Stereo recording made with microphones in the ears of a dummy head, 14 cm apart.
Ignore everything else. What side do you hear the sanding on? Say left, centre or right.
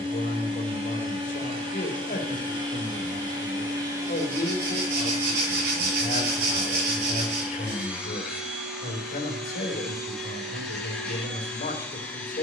right.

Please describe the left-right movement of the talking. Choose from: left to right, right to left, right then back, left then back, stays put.
stays put.